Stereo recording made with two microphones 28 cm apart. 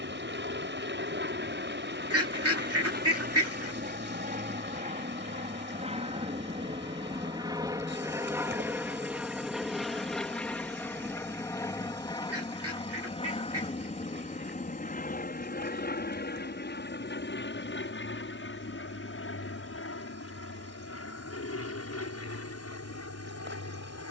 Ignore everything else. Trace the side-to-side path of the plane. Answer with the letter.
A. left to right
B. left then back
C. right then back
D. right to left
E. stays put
D.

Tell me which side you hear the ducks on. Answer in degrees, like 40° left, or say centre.
60° right.